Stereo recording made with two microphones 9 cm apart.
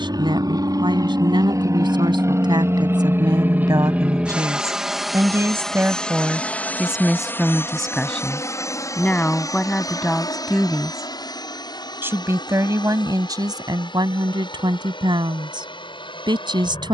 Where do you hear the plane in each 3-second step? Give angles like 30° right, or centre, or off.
40° right, 10° right, 20° left, 40° left, 50° left, 60° left.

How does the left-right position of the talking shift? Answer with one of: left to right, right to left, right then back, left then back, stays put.
left then back.